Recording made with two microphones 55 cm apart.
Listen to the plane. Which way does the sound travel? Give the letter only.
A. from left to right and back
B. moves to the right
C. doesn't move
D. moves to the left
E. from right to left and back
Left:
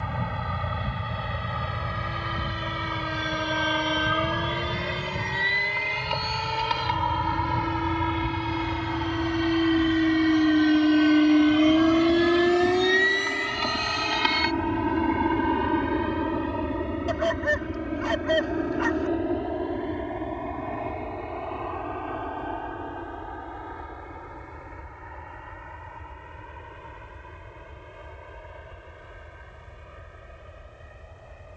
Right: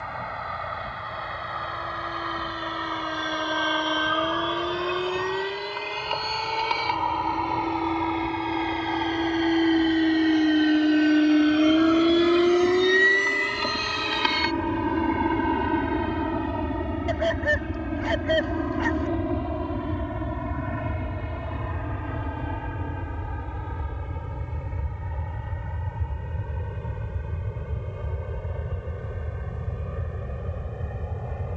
B.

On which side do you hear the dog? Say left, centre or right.
left.